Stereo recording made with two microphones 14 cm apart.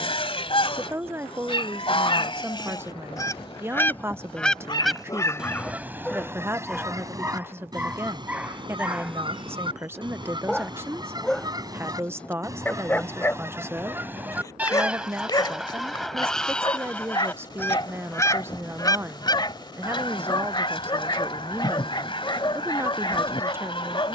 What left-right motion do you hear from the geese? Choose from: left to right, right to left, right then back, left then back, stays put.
right then back.